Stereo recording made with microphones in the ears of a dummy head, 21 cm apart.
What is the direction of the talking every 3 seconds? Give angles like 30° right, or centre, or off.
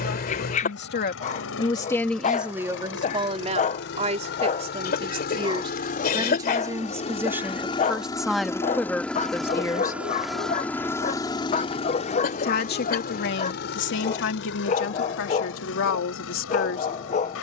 20° left, 30° right, 10° right, 10° left, 50° left, 60° left.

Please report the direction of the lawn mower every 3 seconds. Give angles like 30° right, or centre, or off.
60° left, 50° left, 20° left, 10° left, 50° left, 60° left.